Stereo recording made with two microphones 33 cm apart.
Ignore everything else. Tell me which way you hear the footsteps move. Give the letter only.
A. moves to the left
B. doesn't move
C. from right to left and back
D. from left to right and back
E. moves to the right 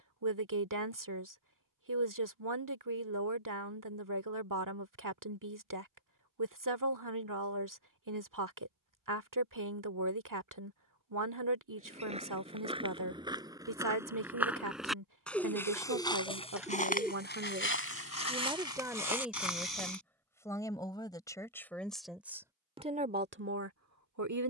A.